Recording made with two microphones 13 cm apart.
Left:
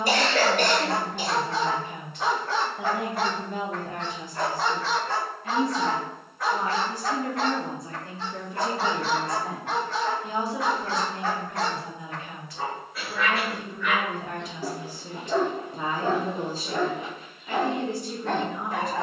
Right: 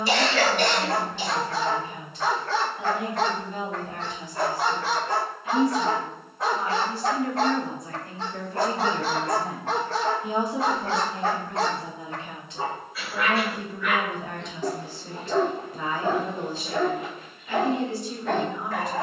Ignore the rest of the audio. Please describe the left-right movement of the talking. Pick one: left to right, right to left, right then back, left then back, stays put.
right then back.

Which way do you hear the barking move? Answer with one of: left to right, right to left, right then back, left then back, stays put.
right then back.